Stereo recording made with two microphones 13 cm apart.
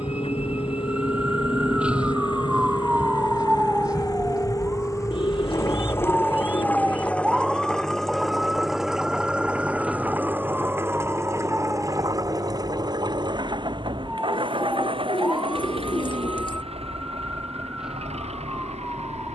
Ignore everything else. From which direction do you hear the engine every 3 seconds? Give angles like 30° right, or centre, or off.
40° left, 30° left, 10° left, 20° right, 40° right, 50° right, 60° right.